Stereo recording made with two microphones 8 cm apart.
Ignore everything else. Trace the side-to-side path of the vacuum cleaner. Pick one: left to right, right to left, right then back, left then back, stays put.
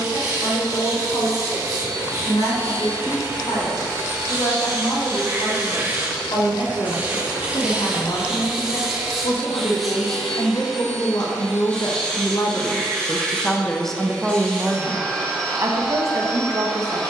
right to left.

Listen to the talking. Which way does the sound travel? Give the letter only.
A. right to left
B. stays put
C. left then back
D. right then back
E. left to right
E.